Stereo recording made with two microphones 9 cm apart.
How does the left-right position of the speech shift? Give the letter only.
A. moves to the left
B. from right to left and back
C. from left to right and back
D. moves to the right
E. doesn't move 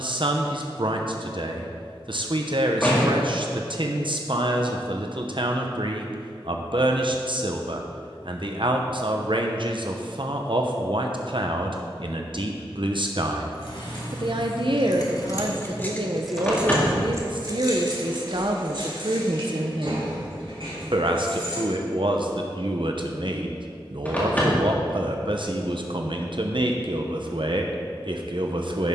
E.